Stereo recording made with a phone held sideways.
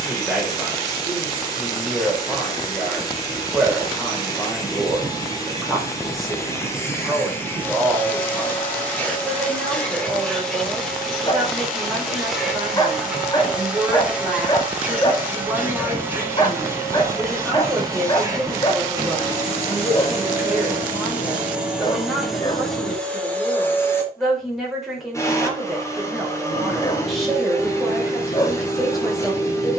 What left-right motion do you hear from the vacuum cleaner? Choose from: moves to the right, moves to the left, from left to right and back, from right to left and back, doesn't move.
from left to right and back.